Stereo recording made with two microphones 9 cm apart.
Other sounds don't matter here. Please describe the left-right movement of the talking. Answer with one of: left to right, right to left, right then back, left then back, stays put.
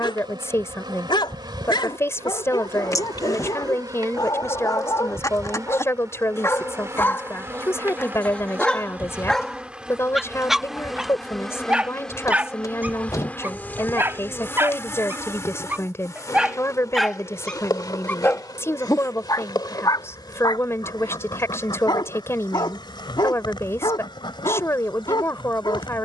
stays put.